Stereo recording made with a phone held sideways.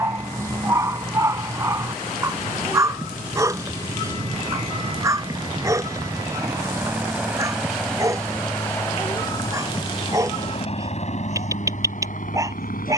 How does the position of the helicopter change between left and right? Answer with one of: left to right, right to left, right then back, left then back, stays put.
right to left.